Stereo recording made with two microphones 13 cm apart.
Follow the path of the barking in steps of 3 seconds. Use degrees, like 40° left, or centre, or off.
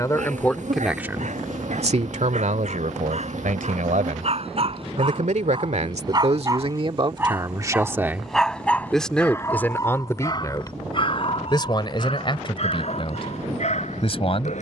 70° right, 50° right, 10° right, 30° left, 60° left.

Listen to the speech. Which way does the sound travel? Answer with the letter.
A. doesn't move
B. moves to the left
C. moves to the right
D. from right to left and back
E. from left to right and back
E.